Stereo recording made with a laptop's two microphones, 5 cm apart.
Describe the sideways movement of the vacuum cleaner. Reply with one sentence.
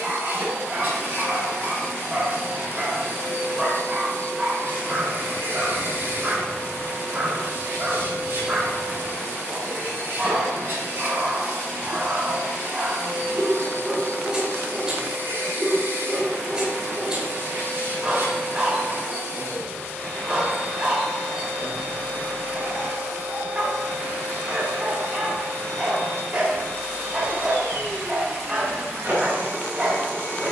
You can hear the vacuum cleaner stay put.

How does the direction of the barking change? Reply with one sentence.
In this clip you hear the barking stay in one place.